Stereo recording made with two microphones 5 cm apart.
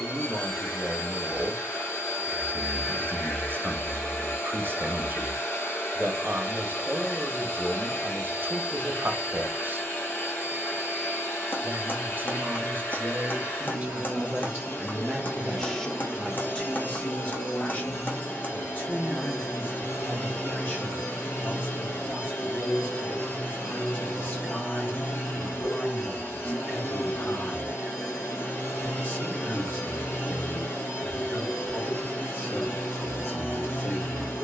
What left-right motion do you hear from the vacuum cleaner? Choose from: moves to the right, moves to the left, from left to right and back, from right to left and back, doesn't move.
doesn't move.